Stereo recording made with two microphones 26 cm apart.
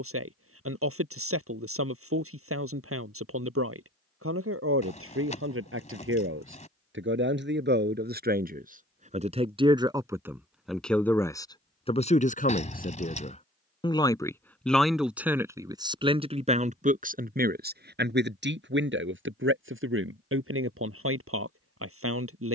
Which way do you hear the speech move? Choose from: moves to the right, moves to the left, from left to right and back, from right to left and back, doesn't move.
from right to left and back.